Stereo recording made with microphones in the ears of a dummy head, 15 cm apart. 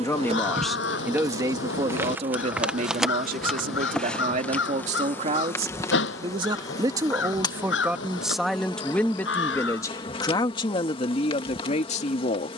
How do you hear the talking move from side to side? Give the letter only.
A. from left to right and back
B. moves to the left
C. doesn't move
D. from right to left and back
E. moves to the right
A.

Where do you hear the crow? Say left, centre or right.
left.